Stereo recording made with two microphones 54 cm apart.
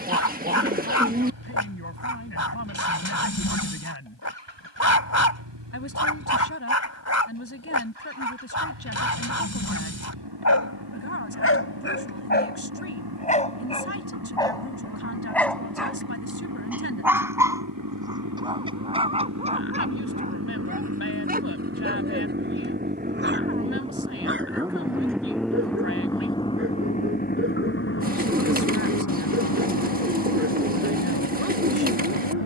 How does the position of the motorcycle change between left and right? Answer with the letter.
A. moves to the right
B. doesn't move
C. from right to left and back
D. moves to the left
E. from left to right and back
D.